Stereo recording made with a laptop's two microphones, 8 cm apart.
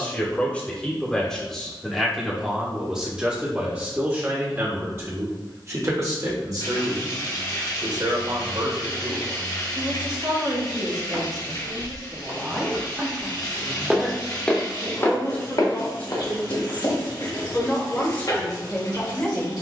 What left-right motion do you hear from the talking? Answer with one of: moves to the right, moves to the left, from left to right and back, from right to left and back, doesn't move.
from left to right and back.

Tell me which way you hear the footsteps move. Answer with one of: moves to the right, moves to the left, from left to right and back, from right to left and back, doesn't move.
moves to the left.